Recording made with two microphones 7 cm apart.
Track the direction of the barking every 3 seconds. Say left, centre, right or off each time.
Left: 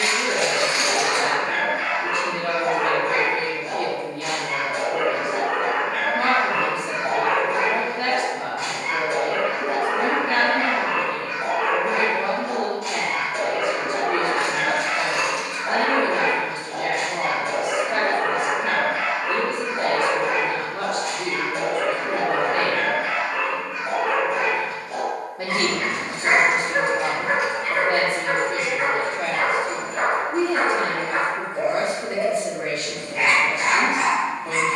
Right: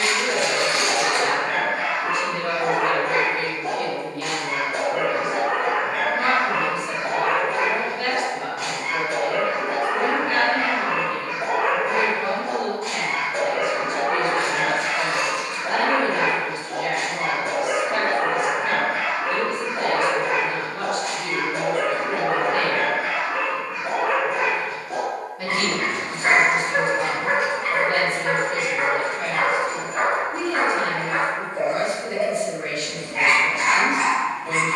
right, right, centre, centre, right, right, right, right, right, right, right, right.